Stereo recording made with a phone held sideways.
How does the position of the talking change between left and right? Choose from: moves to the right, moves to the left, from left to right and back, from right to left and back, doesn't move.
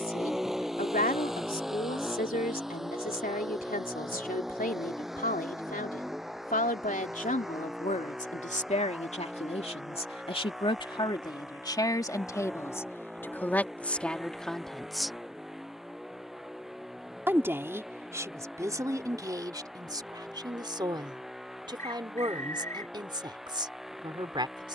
moves to the right.